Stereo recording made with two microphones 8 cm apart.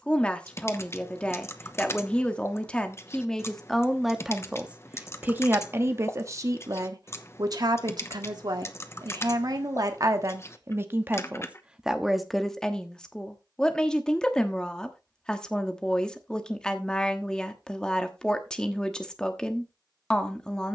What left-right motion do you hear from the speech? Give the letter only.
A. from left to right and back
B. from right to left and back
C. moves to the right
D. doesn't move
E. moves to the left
A.